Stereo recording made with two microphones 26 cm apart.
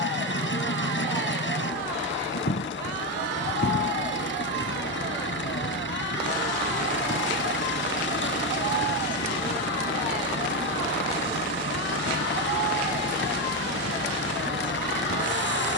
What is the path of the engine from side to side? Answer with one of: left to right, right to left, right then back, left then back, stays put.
stays put.